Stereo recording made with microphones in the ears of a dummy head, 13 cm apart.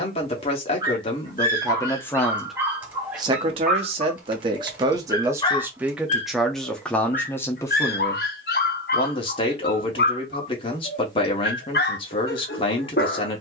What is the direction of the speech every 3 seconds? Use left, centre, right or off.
left, right, centre, left, left.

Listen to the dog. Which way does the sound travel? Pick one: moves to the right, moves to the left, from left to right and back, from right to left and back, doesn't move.
moves to the left.